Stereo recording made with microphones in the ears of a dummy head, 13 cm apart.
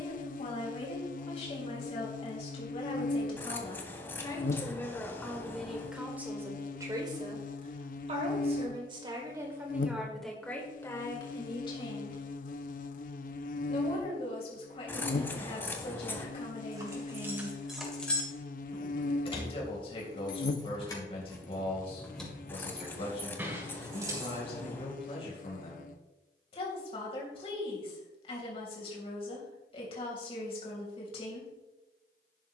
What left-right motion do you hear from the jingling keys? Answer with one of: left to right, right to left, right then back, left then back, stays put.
left then back.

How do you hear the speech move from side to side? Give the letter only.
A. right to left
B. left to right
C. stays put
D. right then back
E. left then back
D.